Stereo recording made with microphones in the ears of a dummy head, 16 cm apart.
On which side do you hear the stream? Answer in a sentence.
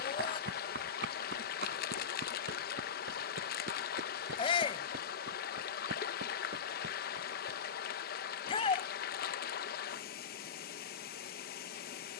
In this clip you hear the stream on the left.